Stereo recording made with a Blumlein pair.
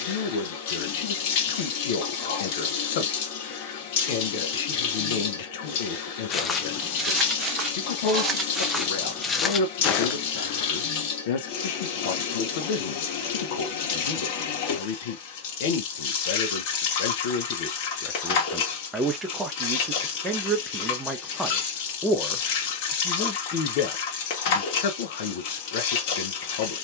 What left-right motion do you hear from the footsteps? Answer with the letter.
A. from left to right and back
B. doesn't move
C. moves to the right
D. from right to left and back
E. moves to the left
A.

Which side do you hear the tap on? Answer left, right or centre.
left.